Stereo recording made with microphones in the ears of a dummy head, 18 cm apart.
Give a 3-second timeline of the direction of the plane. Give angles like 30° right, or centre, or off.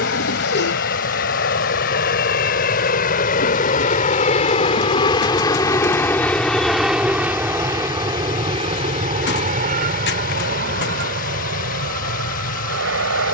50° left, 30° left, 10° right, 40° right, 50° right.